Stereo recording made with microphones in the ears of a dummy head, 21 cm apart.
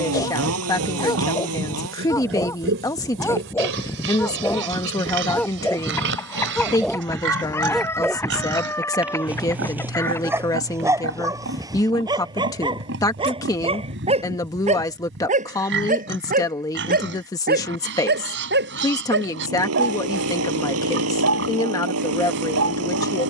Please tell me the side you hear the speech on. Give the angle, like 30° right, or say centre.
10° left.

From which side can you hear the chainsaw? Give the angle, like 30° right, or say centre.
70° right.